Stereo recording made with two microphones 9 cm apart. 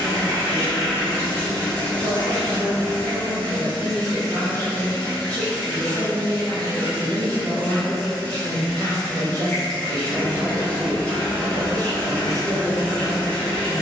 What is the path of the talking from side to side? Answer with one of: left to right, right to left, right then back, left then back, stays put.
stays put.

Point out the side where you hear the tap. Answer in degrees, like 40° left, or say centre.
20° left.